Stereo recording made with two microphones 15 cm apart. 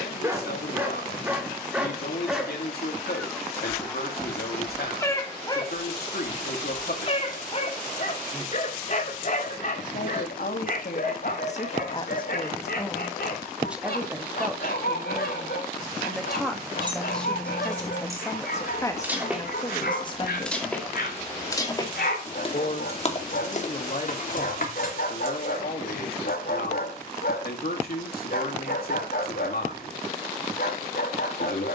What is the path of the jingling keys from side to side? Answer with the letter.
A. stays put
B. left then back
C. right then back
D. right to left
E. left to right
D.